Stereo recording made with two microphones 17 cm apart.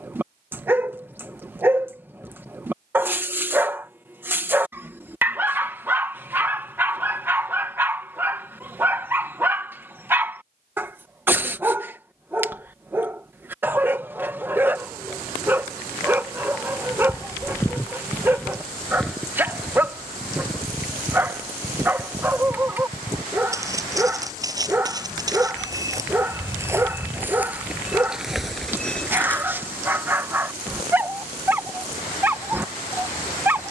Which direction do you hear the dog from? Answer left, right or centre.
centre.